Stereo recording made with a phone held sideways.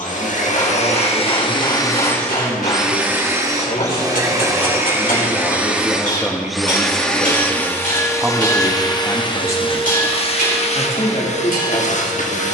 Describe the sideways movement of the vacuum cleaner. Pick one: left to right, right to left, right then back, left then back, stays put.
right then back.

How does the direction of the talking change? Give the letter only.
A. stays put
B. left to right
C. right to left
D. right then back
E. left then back
D.